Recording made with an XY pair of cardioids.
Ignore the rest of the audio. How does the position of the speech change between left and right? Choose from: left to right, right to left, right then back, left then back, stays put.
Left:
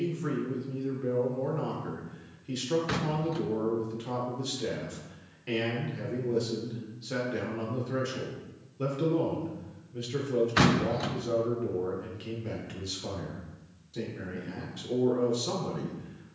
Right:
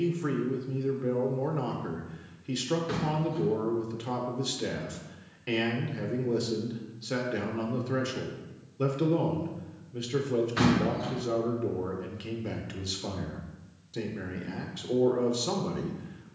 stays put.